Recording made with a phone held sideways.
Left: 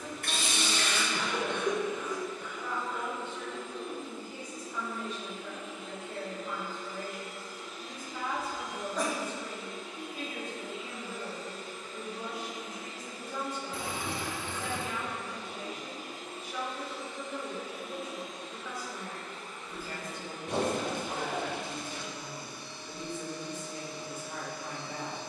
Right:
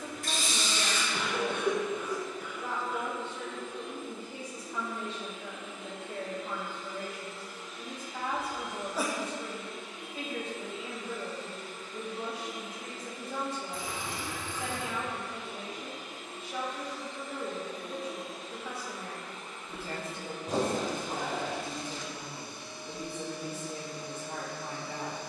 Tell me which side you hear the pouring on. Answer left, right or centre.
left.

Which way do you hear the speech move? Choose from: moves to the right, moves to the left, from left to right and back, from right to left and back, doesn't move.
doesn't move.